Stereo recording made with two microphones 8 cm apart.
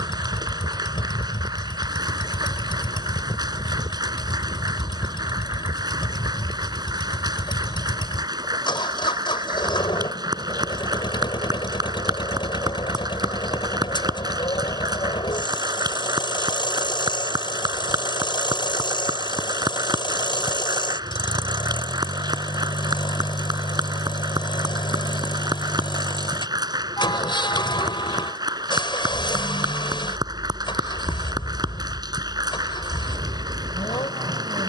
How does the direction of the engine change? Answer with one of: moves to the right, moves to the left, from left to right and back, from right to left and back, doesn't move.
doesn't move.